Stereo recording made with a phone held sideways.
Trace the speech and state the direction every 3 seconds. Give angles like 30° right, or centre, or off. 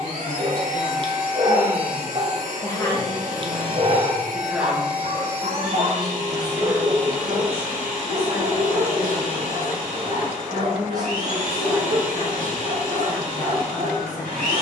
30° left, centre, 40° right, 30° right, 10° left.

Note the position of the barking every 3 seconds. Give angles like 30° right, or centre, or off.
40° right, 50° right, 70° right, 70° right, 70° right.